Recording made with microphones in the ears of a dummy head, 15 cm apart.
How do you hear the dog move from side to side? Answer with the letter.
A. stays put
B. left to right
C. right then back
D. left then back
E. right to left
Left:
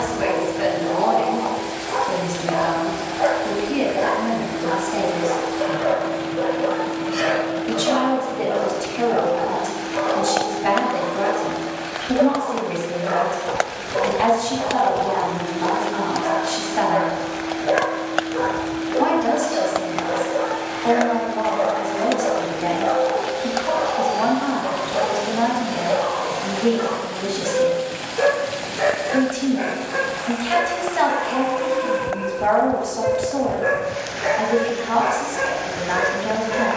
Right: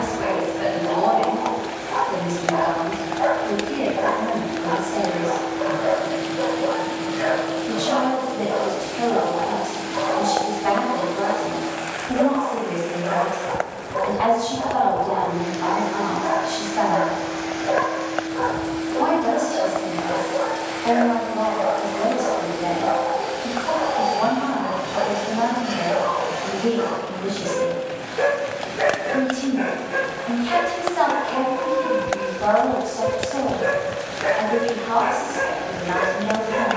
B.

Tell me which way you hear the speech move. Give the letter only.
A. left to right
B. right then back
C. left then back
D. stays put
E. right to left
D.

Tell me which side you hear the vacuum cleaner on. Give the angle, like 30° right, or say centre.
70° right.